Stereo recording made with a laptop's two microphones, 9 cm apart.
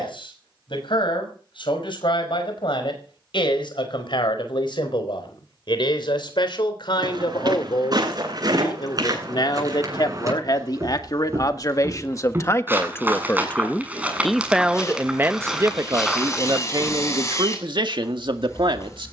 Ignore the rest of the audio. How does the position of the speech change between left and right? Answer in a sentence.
In this clip you hear the speech travel towards the right.